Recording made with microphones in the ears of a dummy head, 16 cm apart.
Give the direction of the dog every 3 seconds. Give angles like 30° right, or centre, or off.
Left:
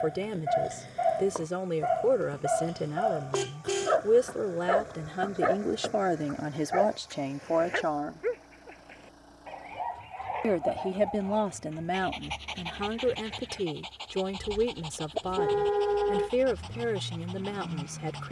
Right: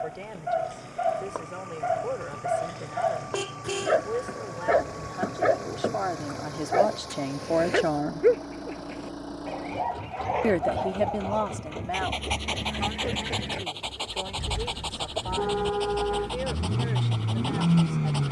centre, 30° right, 50° right, 60° right, 70° right, 70° right.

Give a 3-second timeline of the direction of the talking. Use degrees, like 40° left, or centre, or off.
60° left, 50° left, centre, 10° left, 50° left, 60° left.